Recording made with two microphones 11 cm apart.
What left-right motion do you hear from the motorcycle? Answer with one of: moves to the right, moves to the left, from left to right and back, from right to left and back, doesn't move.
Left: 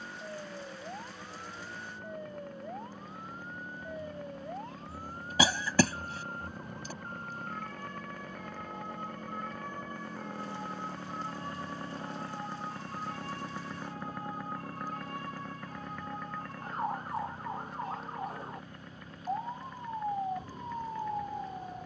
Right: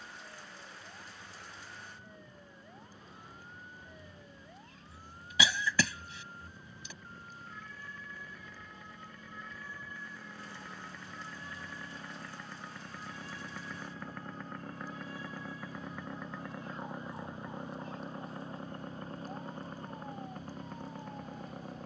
moves to the right.